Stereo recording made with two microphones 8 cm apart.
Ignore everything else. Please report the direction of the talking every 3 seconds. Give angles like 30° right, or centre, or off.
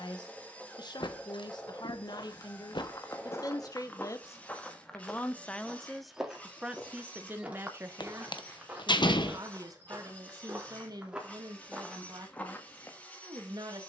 60° left, 30° left, 20° right, 50° right, 60° right.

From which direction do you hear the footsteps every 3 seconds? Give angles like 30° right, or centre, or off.
50° left, 20° left, 20° right, 20° right, 20° left.